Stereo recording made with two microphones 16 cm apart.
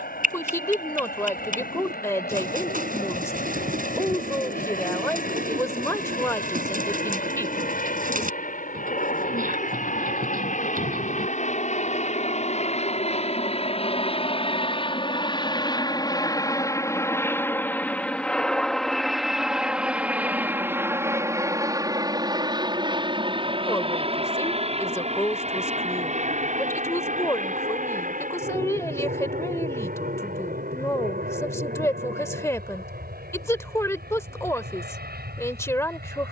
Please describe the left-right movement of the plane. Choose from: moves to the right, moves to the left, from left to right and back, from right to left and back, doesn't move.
moves to the right.